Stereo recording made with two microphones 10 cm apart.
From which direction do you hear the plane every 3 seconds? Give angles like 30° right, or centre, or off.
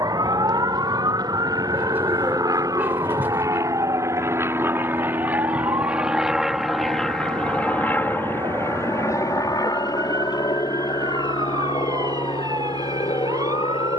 50° right, 30° right, 10° left, 40° left, 60° left.